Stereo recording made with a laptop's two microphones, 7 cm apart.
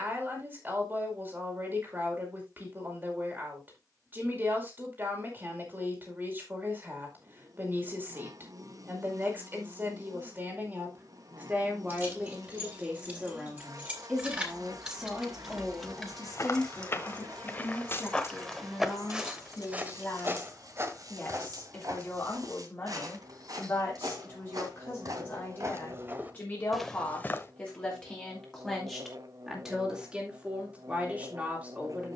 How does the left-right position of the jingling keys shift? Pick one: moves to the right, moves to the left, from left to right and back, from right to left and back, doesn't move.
moves to the left.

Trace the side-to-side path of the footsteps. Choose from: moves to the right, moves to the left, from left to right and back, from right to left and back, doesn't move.
from left to right and back.